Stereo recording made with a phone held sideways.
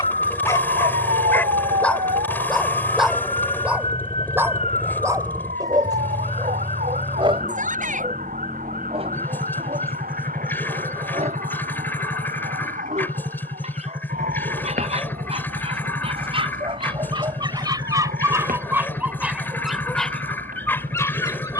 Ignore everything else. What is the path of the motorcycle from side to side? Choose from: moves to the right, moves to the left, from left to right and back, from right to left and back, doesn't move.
doesn't move.